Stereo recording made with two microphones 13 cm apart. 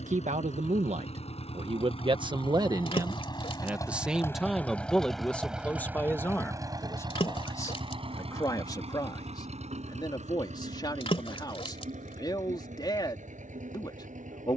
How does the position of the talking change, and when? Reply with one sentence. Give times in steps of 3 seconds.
In this clip you hear the talking on the right from 0 s, in the centre from 3 s and on the left from 6 s.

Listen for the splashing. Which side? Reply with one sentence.
In this clip you hear the splashing on the left.